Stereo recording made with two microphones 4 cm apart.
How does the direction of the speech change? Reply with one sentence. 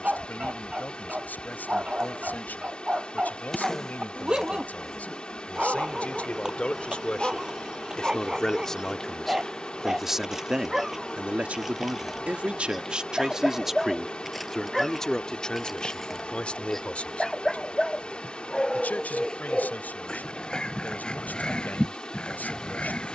In this clip you hear the speech go right and come back.